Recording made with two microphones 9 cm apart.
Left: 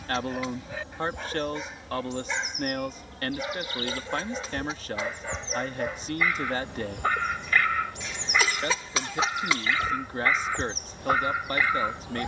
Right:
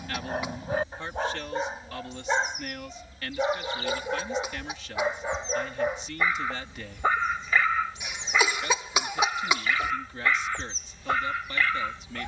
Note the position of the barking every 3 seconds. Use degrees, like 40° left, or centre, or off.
40° right, 30° right, 10° right, 10° left.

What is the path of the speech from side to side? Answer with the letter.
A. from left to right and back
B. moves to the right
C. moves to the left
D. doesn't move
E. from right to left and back
D.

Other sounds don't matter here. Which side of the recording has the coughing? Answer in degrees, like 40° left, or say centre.
20° right.